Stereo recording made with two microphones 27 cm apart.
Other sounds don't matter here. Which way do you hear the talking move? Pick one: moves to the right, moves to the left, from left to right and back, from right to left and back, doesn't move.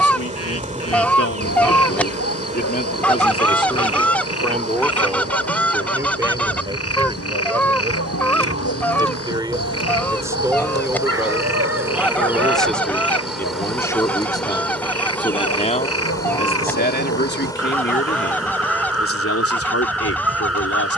from left to right and back.